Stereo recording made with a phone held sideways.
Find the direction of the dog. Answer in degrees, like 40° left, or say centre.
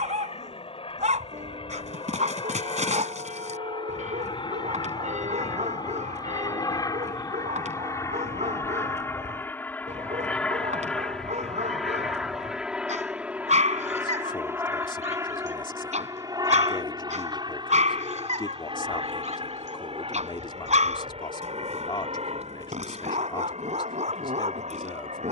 70° right.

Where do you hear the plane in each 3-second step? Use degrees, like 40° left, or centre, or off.
50° left, 40° left, 30° left, 10° left, 10° right, 30° right, 40° right, 50° right, 60° right.